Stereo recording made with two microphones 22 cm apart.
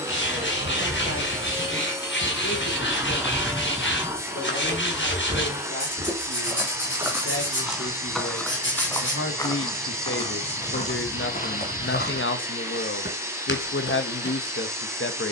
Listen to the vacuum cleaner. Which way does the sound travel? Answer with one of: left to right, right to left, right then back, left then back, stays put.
stays put.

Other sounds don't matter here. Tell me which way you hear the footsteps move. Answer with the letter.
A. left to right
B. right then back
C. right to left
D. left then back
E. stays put
B.